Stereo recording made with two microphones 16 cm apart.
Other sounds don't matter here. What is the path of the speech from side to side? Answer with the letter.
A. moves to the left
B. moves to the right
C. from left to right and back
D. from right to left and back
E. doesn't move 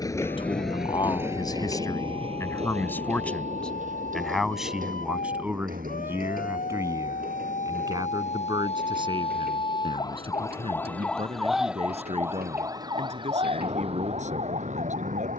B.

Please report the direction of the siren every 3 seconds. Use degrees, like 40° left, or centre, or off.
70° left, 70° left, 50° left, 20° left, 30° right.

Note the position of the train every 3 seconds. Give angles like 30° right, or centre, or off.
20° right, 50° right, 60° right, 70° right, 70° right.